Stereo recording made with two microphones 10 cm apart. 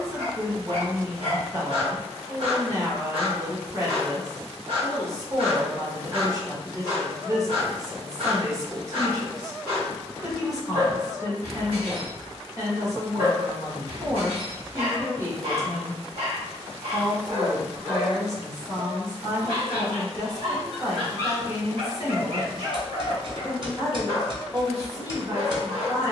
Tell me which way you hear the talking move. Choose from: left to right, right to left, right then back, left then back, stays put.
stays put.